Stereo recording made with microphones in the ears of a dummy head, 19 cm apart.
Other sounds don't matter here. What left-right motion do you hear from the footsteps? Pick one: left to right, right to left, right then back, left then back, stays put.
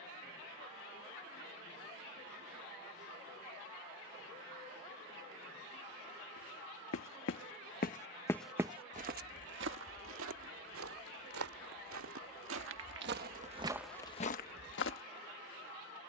right then back.